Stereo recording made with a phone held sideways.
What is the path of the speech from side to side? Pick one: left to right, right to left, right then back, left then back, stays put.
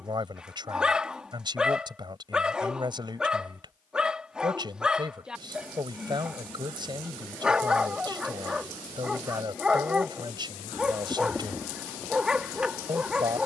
stays put.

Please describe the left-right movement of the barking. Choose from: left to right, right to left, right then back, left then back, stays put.
stays put.